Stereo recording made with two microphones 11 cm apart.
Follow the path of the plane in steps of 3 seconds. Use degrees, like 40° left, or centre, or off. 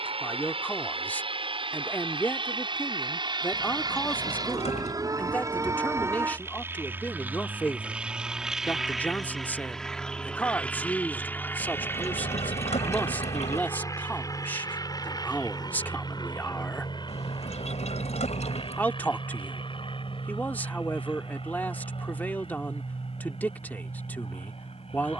50° right, 30° right, 10° right, 10° left, 30° left, 40° left, 50° left, 50° left, 50° left.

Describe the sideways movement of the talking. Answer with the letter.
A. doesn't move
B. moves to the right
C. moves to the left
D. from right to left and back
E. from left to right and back
A.